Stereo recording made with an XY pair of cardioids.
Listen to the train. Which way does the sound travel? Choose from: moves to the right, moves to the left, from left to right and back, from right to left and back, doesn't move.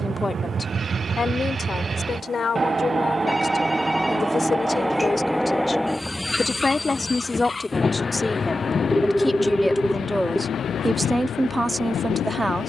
moves to the left.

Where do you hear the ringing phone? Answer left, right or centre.
centre.